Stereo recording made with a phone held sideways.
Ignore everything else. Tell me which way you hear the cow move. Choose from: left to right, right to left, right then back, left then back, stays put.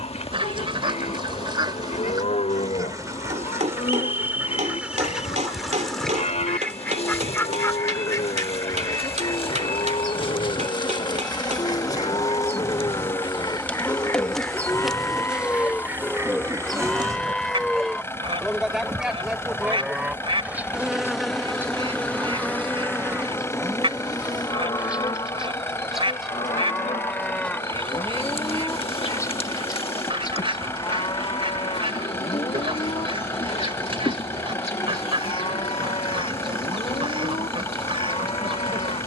right then back.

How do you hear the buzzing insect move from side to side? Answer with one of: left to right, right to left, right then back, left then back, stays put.
right then back.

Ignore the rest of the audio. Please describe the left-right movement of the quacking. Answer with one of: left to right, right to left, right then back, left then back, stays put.
left then back.